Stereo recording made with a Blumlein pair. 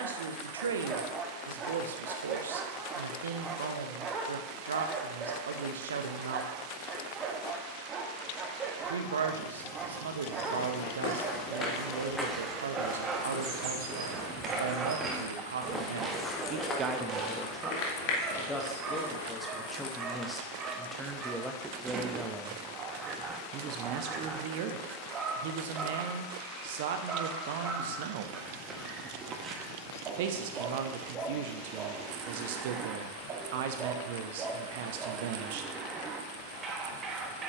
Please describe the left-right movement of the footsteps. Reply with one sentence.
In this clip you hear the footsteps move from left to right and back again.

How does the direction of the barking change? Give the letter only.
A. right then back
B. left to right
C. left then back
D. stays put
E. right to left
D.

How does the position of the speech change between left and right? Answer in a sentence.
You can hear the speech move from right to left and back again.